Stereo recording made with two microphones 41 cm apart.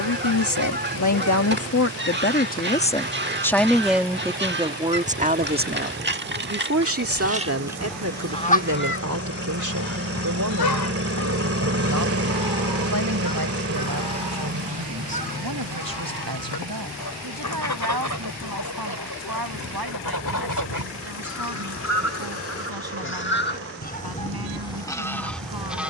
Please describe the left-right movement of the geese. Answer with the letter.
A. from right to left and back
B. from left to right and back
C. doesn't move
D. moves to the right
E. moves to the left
A.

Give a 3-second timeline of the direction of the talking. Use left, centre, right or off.
left, centre, right, right, right, right, right, right, right.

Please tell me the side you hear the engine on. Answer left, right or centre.
right.